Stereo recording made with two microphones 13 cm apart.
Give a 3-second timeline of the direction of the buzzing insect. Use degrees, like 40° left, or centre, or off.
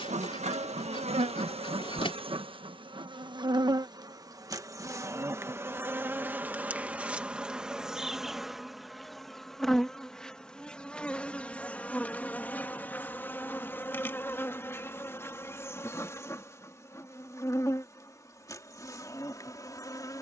50° right, 30° right, 10° right, 10° left, 10° left, 20° left, 20° left.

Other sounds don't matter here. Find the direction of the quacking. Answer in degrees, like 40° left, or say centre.
40° left.